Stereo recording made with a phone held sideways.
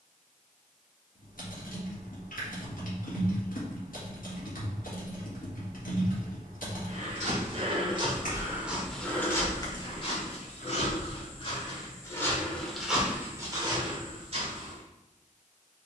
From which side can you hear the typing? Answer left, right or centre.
left.